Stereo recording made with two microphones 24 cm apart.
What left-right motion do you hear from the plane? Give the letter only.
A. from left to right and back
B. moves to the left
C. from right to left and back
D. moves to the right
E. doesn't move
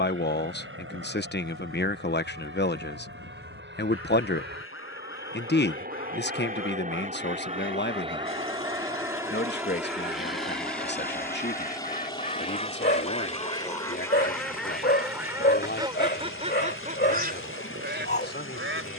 B.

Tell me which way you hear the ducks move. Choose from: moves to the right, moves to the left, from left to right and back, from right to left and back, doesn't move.
moves to the right.